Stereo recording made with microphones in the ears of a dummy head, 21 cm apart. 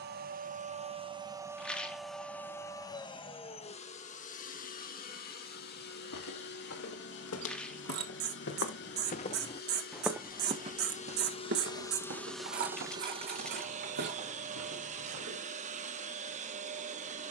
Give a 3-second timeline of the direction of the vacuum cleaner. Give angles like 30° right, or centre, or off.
10° right, 30° left, 50° left, 40° left, 20° right, 30° right.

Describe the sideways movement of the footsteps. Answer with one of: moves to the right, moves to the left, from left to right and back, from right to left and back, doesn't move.
moves to the right.